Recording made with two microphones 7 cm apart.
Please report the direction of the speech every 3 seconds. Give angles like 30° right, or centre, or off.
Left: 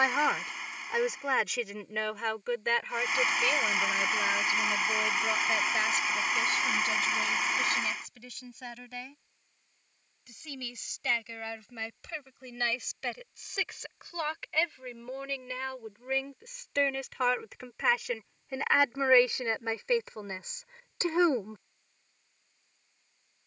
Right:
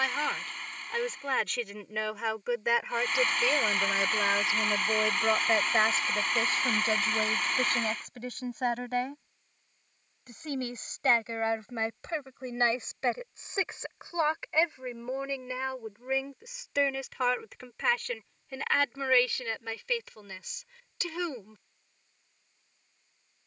centre, 30° right, 40° right, 40° right, 30° right, 10° right, 20° left, 30° left.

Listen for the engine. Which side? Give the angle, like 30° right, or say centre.
10° left.